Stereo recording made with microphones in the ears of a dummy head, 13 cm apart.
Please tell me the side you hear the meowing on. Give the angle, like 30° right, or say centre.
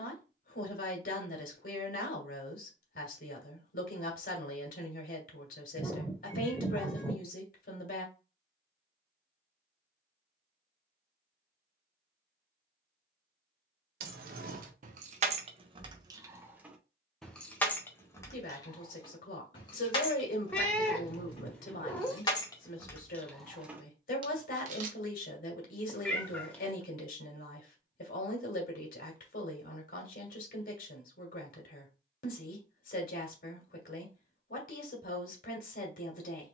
10° left.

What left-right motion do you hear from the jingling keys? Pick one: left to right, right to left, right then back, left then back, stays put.
left then back.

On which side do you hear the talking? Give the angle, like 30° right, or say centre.
60° left.